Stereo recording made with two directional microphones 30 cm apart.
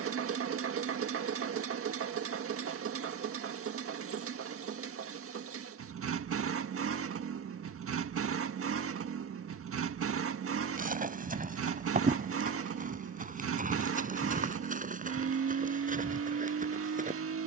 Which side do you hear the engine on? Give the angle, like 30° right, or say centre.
50° right.